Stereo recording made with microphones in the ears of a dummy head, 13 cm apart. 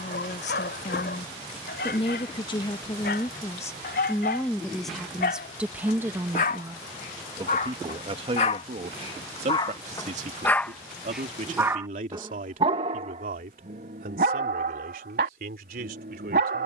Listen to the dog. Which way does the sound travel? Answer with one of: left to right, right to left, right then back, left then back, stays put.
left to right.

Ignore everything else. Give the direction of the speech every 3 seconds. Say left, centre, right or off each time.
left, centre, right, right, right, right.